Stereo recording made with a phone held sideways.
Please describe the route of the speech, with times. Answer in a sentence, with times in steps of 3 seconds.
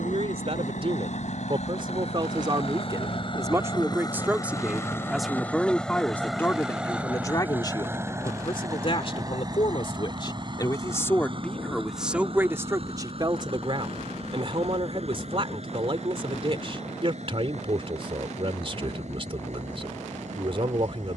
In this clip you hear the speech on the right from 0 s, in the centre from 3 s, on the left from 6 s and on the right from 12 s.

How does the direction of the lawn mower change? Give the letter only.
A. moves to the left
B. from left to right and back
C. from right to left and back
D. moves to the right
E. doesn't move
D.